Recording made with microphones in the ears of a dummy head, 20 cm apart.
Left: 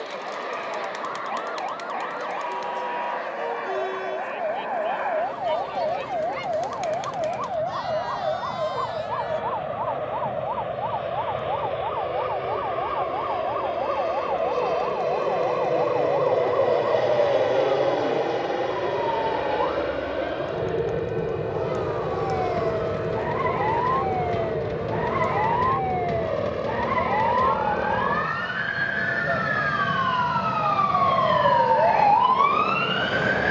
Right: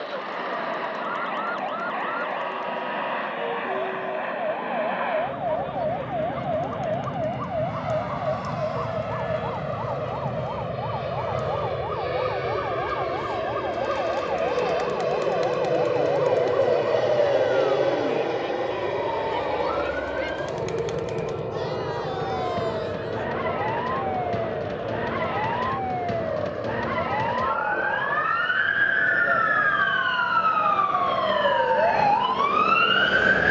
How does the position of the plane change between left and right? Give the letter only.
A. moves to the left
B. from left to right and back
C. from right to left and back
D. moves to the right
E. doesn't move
A.